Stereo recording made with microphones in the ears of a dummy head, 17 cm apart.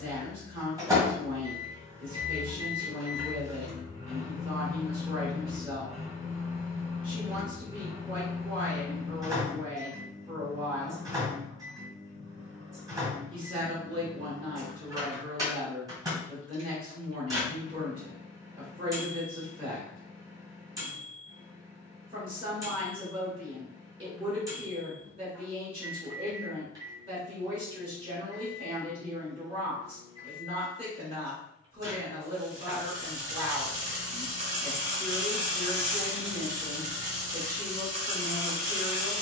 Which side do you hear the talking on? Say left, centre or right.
right.